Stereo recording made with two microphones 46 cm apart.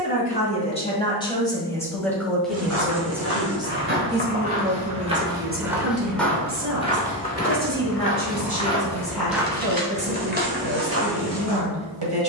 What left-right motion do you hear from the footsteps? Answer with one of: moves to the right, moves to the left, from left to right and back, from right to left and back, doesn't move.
from right to left and back.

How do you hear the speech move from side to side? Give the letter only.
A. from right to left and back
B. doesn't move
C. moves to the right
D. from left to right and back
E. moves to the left
C.